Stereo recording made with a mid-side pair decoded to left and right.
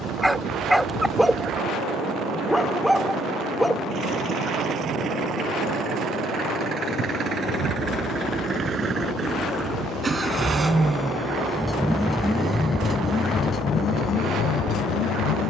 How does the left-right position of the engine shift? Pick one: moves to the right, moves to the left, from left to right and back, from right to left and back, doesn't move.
moves to the left.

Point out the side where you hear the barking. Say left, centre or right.
centre.